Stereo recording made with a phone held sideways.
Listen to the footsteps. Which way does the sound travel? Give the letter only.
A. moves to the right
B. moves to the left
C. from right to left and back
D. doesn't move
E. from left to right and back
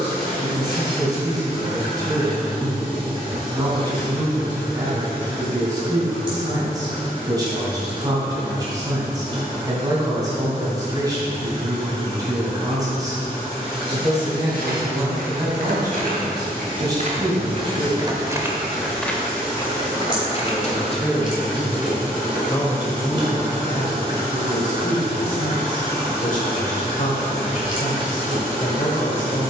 B.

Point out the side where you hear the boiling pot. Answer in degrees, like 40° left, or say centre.
30° right.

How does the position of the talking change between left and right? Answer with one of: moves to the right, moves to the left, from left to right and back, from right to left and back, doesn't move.
moves to the left.